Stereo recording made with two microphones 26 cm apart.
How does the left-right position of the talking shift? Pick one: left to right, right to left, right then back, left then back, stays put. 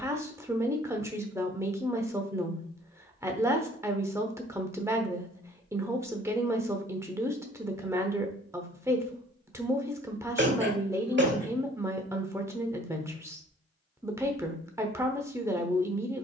stays put.